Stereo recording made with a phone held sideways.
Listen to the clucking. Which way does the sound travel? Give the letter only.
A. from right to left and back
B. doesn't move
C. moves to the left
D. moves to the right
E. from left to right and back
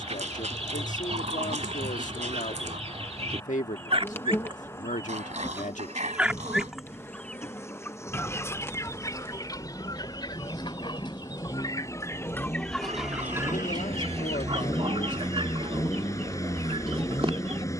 A.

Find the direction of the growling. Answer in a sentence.
You can hear the growling on the right.